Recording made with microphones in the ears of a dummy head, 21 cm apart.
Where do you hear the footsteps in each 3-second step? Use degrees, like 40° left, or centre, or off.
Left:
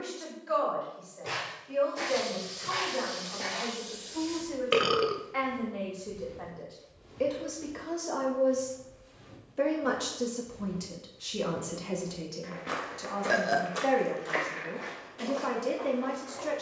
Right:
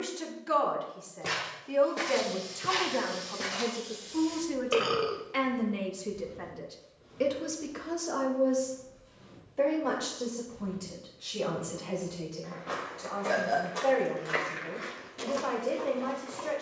50° right, 10° left, 50° left, 50° left, 10° left, 40° right.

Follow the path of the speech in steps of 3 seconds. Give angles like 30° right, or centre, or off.
60° right, 50° right, 20° right, 30° left, 40° left, 40° left.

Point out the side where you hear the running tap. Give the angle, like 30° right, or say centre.
70° left.